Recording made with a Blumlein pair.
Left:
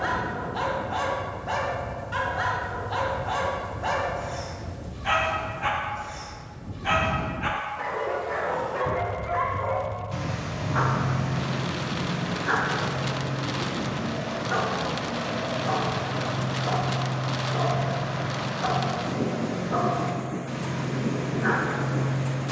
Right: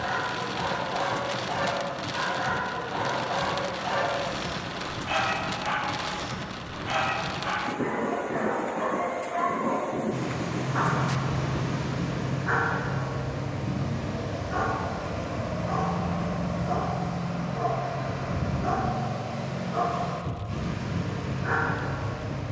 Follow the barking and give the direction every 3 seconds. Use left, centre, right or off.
left, left, left, centre, left, left, left, left.